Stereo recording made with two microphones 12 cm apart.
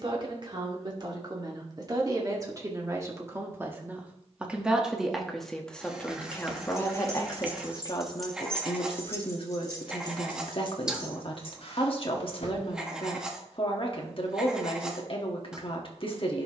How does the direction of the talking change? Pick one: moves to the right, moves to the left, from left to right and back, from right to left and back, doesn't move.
moves to the left.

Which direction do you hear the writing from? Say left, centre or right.
centre.